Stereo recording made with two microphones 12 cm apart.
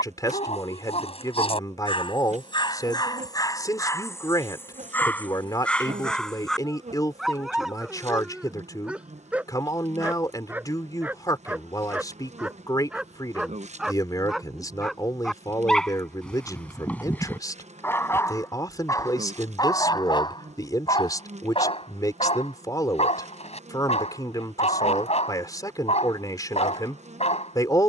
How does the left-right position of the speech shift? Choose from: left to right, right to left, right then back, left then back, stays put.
stays put.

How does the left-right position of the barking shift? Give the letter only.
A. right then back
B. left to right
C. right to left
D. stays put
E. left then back
A.